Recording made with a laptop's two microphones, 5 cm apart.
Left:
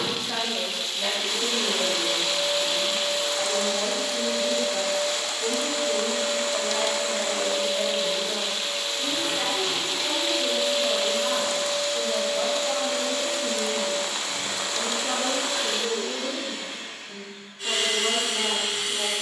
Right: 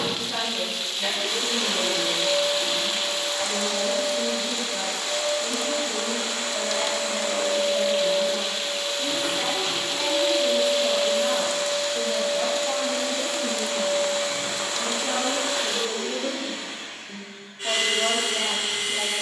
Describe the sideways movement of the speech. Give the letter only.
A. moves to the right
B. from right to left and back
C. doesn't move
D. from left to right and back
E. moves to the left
A.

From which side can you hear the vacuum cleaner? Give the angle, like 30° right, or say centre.
30° right.